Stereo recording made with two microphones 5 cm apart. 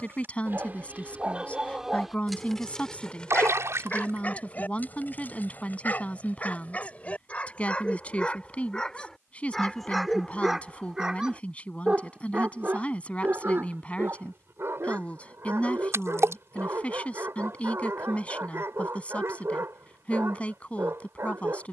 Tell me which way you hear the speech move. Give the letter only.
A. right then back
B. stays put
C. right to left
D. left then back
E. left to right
B.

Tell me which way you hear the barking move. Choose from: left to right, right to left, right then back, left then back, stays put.
left then back.